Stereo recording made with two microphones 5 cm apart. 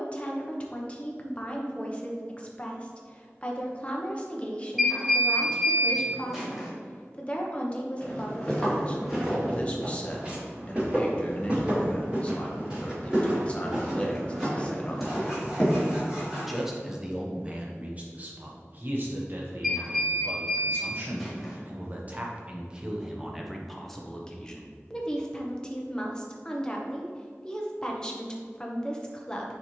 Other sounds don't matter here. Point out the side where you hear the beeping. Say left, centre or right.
centre.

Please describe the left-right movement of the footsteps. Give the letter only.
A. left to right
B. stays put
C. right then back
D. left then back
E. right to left
C.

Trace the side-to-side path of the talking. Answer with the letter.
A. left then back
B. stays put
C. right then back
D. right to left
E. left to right
C.